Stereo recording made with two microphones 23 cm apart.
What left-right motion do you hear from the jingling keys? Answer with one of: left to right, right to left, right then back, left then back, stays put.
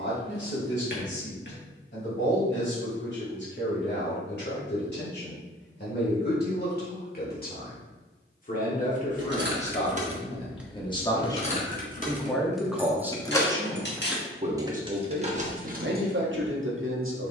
left then back.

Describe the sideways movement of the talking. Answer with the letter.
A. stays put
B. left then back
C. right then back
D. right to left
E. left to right
E.